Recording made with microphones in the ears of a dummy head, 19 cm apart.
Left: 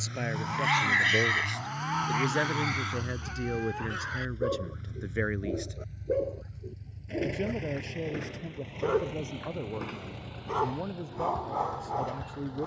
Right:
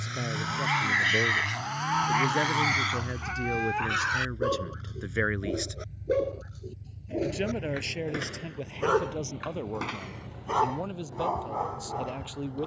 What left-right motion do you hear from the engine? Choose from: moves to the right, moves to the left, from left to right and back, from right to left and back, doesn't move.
moves to the left.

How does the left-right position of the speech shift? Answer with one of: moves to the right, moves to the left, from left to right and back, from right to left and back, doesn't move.
moves to the right.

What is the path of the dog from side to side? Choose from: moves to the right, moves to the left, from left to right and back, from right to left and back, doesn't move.
from left to right and back.